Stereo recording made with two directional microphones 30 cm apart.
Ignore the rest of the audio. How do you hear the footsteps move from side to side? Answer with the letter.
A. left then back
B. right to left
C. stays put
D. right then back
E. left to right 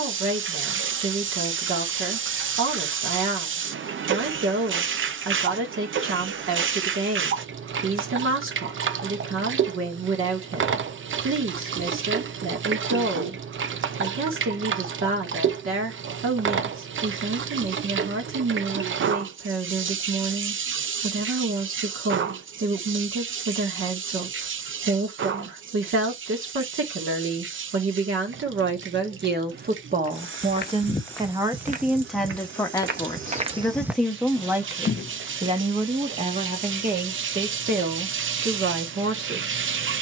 D.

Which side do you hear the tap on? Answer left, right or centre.
right.